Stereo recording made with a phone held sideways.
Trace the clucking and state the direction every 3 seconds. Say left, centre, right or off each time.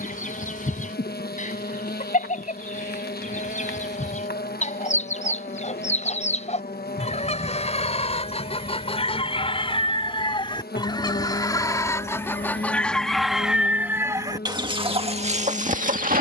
left, left, left, left, centre, right.